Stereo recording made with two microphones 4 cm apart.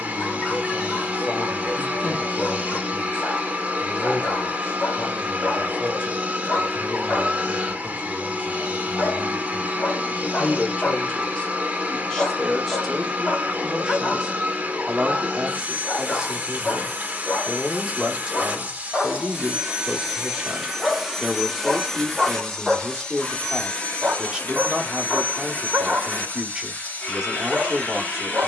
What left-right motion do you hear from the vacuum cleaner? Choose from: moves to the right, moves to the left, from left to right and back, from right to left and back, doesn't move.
moves to the left.